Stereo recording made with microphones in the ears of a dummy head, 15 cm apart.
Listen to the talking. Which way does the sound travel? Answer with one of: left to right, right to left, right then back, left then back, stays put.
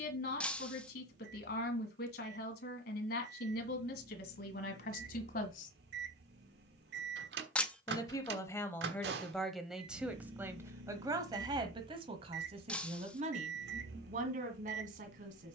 left to right.